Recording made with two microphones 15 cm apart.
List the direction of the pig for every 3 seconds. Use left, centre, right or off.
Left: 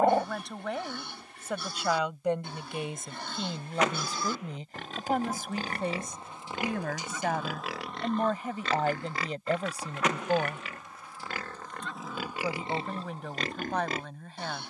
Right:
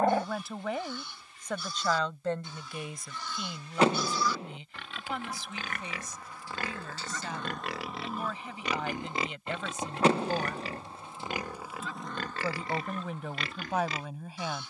left, left, centre, right, left.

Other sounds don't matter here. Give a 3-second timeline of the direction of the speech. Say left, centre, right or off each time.
centre, left, left, left, centre.